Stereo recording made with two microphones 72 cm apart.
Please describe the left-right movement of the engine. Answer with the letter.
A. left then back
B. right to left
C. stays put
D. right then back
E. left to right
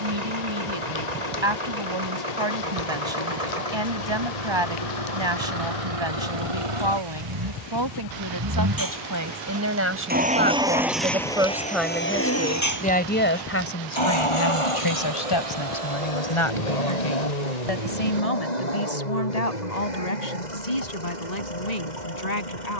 B.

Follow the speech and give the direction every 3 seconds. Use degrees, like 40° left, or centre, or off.
40° right, 40° right, 30° right, 10° right, 20° left, 40° left, 60° left, 70° left.